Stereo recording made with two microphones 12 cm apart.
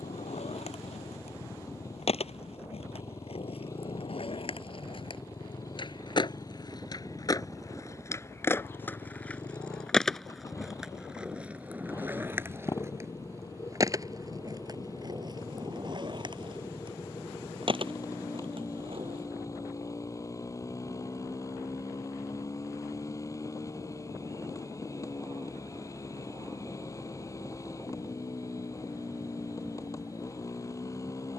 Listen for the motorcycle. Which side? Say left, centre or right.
left.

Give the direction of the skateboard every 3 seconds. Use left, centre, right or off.
left, left, left, centre, right, right, right, off, off, off, off.